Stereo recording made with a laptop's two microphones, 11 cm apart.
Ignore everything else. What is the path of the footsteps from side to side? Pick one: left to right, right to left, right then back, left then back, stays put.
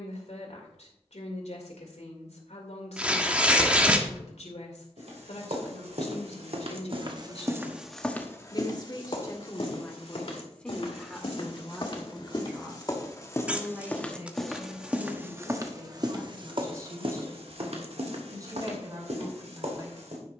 left then back.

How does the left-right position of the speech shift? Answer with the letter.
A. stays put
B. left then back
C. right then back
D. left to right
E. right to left
D.